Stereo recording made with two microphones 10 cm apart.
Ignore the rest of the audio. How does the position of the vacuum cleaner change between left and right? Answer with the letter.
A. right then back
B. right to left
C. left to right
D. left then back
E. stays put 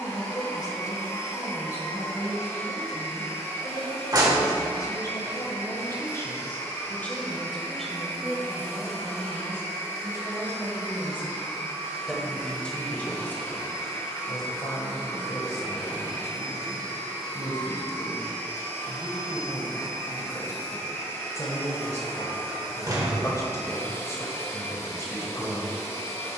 E.